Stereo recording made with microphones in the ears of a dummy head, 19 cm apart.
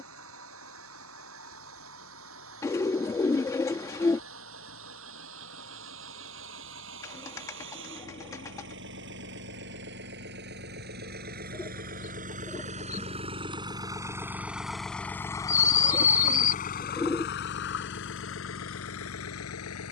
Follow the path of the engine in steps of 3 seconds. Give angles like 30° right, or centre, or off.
70° right, 60° right, 60° right, 50° right, 20° right, 30° left, 70° left.